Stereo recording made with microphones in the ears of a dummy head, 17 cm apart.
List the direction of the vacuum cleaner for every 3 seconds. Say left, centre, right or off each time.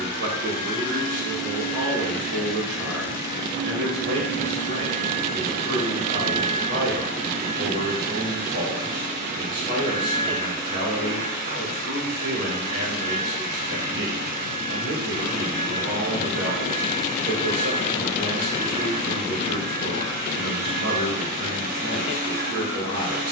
centre, right, right, right, right, right, right, right.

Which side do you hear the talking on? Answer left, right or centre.
right.